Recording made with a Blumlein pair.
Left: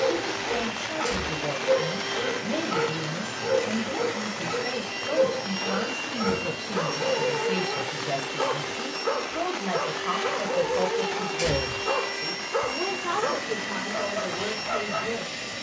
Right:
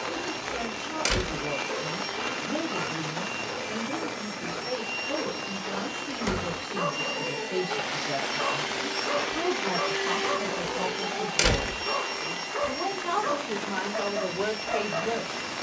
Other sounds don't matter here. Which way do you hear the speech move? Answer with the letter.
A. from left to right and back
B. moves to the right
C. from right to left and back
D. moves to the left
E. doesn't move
B.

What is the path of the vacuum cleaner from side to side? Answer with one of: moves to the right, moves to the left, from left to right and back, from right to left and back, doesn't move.
from left to right and back.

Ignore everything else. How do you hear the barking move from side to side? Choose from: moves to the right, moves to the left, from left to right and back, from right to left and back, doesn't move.
doesn't move.